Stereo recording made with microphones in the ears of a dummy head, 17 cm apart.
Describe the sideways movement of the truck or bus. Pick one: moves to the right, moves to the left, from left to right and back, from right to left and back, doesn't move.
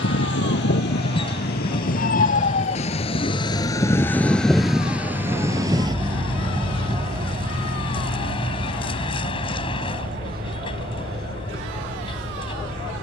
doesn't move.